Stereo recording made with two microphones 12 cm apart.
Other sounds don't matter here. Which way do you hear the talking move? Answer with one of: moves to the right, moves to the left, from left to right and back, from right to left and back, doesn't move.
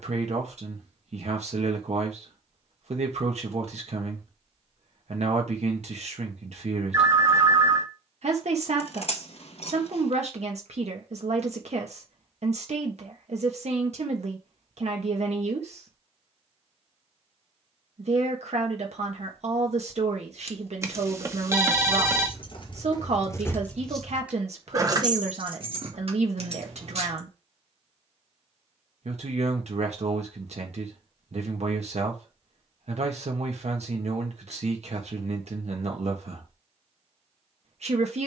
doesn't move.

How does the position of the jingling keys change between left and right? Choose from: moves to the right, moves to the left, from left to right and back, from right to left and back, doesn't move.
moves to the right.